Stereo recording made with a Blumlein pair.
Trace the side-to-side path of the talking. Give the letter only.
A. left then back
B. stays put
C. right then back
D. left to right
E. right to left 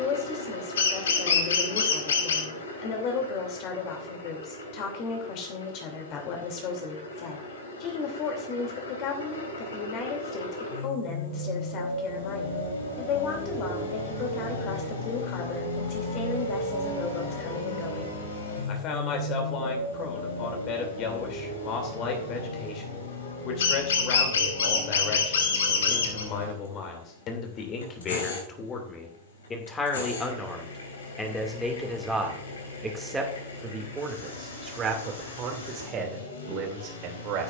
D.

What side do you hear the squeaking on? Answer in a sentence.
In this clip you hear the squeaking on the left.